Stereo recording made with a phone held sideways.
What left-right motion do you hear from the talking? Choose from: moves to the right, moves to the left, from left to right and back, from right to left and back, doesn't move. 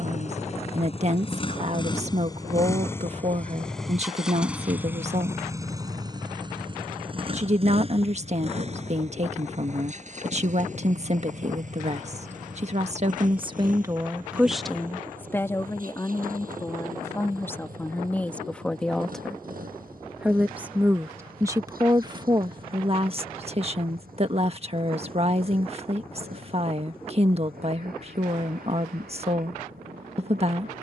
from right to left and back.